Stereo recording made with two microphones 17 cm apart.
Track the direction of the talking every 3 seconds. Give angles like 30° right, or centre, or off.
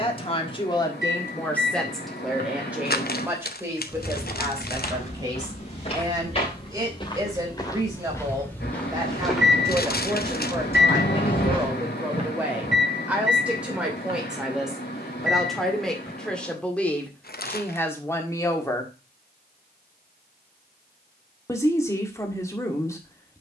10° left, 20° right, 20° right, 20° right, 10° right, 10° left, 20° left, 20° left.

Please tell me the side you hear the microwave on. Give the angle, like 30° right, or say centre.
70° left.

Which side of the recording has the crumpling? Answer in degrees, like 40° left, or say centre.
60° left.